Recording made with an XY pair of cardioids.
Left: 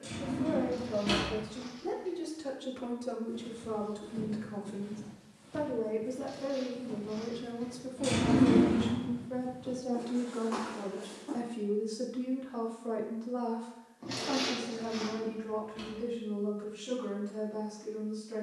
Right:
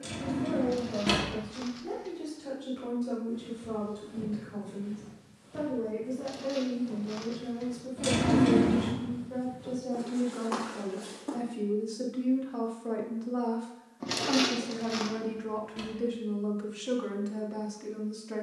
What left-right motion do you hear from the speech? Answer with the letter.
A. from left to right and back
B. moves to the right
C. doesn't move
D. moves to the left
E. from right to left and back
B.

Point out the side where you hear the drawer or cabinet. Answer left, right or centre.
right.